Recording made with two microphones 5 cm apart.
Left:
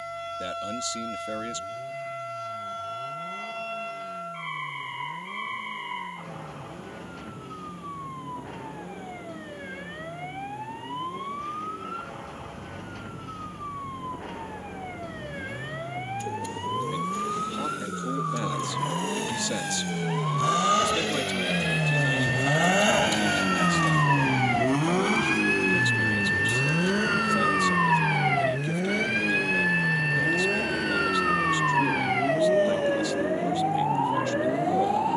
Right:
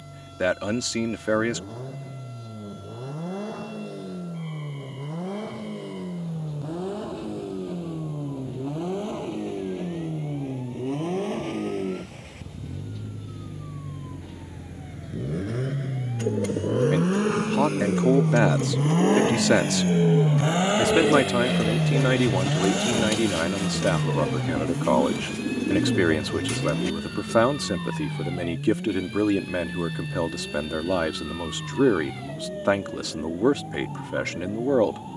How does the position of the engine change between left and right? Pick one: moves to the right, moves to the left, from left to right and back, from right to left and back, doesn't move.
moves to the left.